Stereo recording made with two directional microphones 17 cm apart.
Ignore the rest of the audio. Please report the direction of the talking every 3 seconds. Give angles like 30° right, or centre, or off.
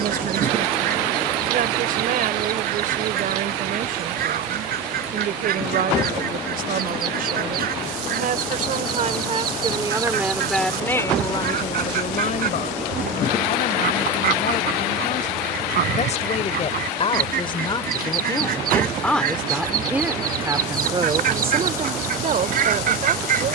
50° right, 50° right, 50° right, centre, 50° left, 40° left, centre, 40° right.